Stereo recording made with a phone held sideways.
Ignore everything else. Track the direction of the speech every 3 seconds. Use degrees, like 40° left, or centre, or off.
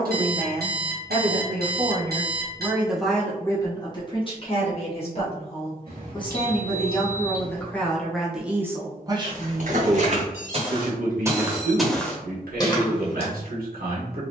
50° right, 30° left, 10° left, 50° right, 80° right.